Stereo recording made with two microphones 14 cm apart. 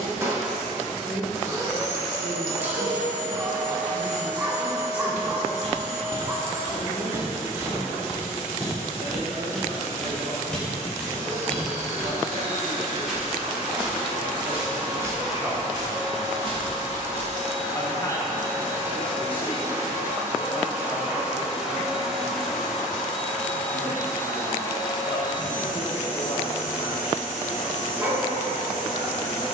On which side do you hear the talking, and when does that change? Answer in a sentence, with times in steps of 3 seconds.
In this clip you hear the talking on the right from 0 s, in the centre from 15 s and on the left from 18 s.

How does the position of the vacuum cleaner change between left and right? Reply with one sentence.
You can hear the vacuum cleaner go from the right side to the left.